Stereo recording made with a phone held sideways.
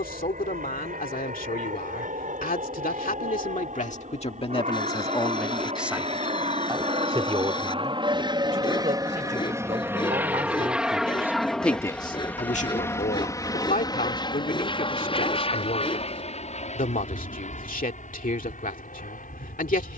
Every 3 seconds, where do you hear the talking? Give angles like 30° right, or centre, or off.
60° left, 30° left, 40° right, 30° right, 60° left, 60° left, 60° left.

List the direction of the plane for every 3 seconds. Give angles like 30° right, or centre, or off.
60° right, 50° right, 40° right, 10° right, 20° left, 40° left, 50° left.